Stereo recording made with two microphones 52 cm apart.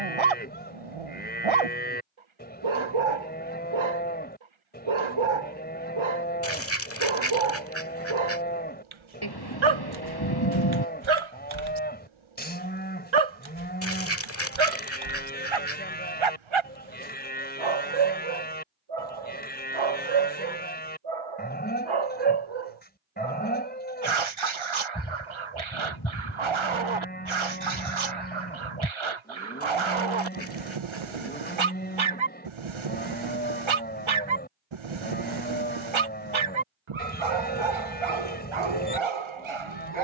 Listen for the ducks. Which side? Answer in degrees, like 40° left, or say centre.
30° left.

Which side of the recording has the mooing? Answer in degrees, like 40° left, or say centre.
20° left.